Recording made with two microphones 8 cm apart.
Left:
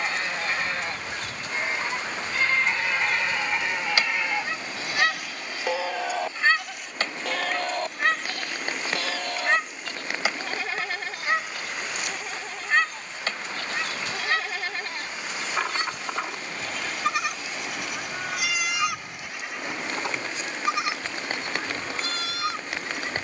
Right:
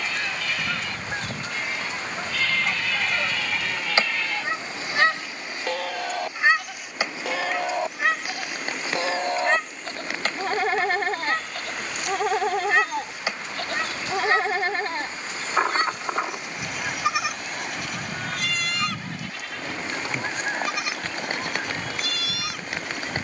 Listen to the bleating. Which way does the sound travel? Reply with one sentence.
In this clip you hear the bleating move from left to right and back again.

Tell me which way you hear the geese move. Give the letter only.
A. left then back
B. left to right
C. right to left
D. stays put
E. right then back
A.